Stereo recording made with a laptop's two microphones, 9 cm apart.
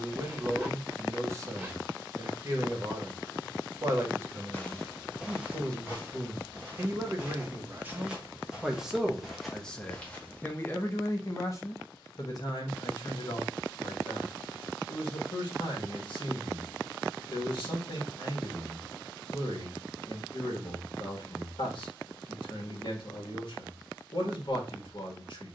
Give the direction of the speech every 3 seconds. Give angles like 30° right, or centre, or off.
30° right, 30° right, 20° right, 20° left, 60° left, 60° left, 60° left, 60° left, 60° left.